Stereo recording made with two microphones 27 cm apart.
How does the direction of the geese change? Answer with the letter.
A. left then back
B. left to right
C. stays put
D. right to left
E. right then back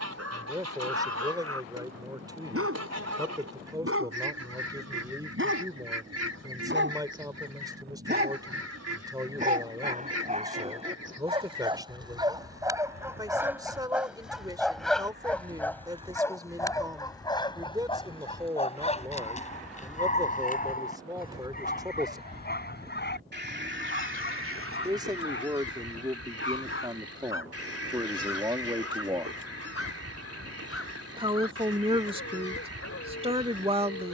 A.